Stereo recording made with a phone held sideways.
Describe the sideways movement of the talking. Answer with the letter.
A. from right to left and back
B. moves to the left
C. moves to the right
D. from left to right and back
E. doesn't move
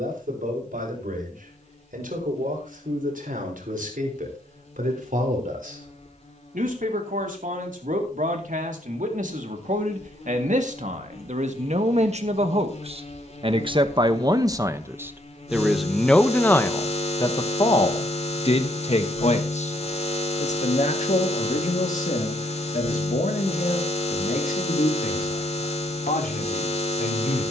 B.